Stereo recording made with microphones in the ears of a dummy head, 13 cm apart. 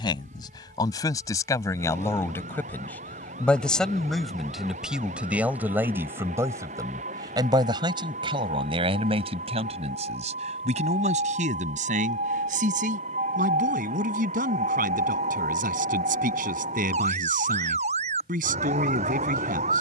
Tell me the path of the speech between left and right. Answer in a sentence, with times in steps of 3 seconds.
In this clip you hear the speech on the left from 0 s, in the centre from 3 s and on the right from 6 s.